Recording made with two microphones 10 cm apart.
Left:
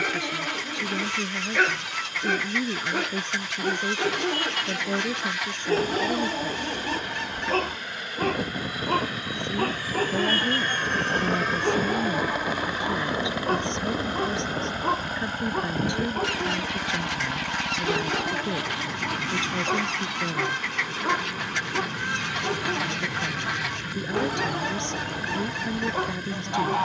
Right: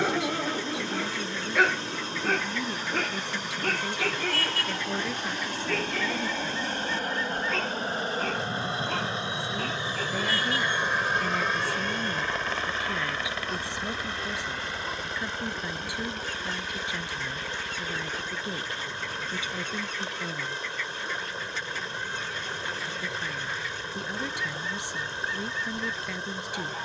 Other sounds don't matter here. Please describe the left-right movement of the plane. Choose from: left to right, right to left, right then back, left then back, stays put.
right to left.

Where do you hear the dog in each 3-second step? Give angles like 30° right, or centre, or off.
10° right, 20° left, 40° left, 50° left, 50° left, 60° left, 60° left, 60° left, 60° left.